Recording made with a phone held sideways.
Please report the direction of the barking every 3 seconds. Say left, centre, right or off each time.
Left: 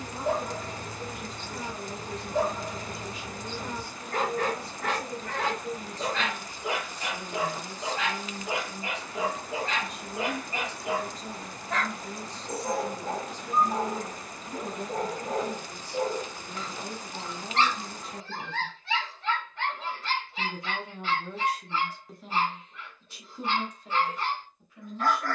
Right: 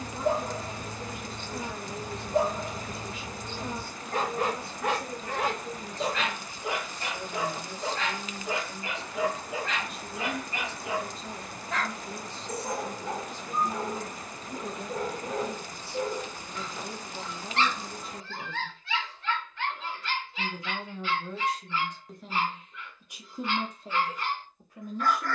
right, right, centre, left, left, left, left, left, left.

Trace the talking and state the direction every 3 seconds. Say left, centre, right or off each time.
left, left, left, left, left, left, left, centre, right.